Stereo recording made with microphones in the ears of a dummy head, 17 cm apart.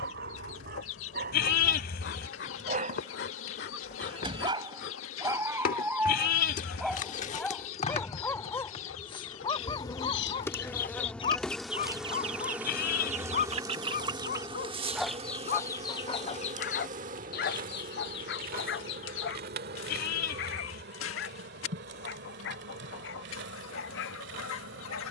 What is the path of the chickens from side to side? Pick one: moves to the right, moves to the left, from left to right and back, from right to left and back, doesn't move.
from left to right and back.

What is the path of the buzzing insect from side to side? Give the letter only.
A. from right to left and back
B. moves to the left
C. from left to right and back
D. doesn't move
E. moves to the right
E.